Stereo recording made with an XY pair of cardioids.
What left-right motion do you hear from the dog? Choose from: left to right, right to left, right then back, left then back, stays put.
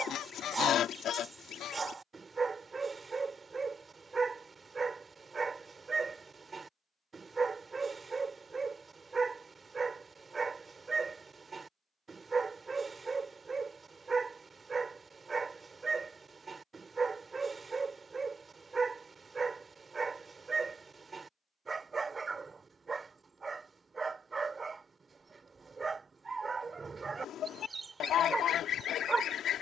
stays put.